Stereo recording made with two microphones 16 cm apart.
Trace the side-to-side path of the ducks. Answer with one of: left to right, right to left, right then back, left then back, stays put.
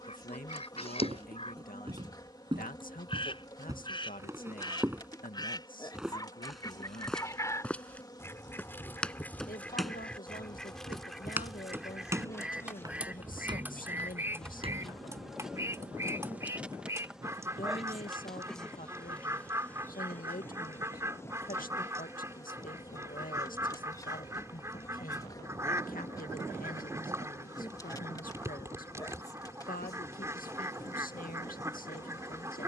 left to right.